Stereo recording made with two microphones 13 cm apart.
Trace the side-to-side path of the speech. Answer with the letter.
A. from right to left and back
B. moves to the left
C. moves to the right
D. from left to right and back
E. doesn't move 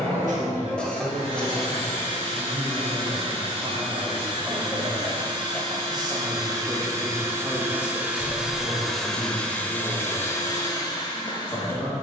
B.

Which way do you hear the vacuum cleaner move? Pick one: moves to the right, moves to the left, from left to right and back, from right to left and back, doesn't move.
moves to the left.